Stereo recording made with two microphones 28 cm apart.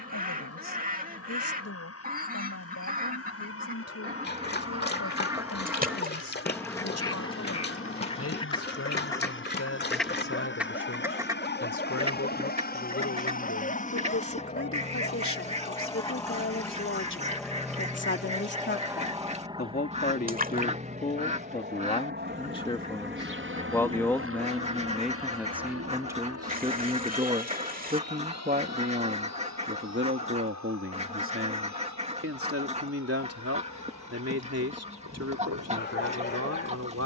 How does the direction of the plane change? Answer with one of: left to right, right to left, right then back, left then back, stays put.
left to right.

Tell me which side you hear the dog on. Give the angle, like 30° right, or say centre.
40° left.